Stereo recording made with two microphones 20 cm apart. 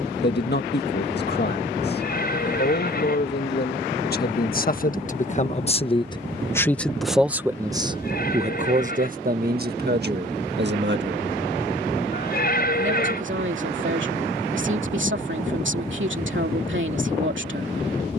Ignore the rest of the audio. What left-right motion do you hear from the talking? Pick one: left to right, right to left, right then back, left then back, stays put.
left to right.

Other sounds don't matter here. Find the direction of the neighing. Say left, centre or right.
left.